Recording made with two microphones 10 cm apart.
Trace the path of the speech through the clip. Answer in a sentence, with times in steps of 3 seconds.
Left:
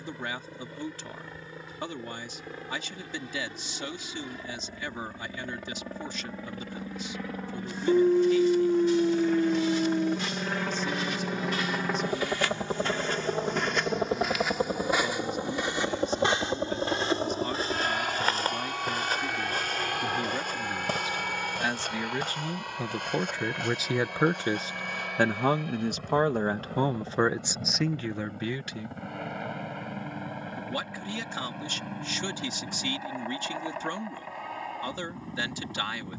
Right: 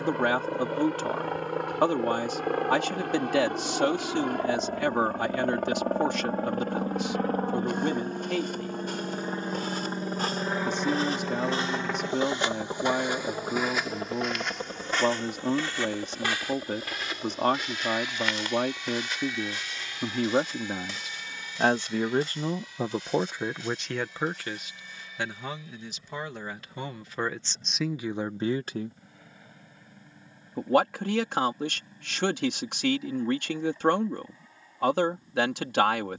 You can hear the speech on the right from 0 s, on the left from 24 s, in the centre from 27 s and on the right from 30 s.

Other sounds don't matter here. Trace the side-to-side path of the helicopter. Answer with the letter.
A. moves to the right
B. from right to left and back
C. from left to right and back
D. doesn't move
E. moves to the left
E.